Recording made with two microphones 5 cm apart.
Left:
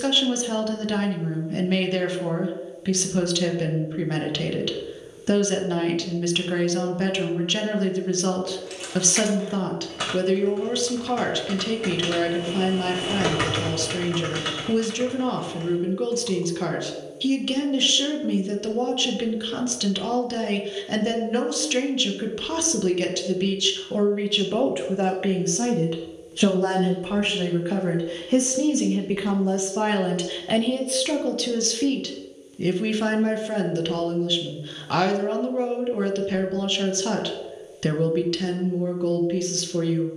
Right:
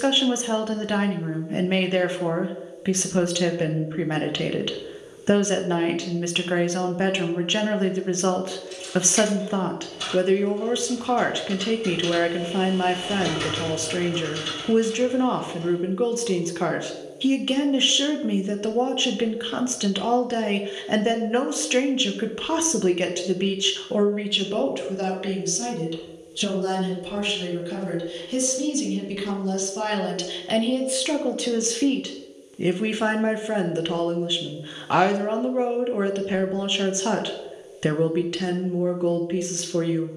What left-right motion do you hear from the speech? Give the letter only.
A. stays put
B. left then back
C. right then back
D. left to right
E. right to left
B.